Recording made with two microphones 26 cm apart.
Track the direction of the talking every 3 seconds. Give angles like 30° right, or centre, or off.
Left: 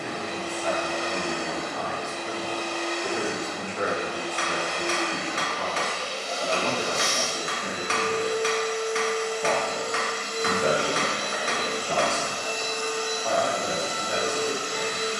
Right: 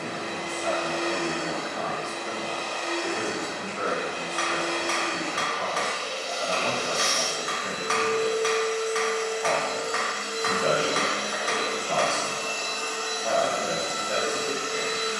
20° right, 30° left, 50° left, 20° left, 20° right.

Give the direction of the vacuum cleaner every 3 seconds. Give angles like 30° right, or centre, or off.
70° right, 60° right, 40° right, 10° right, 30° left.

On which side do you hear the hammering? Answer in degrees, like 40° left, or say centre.
30° left.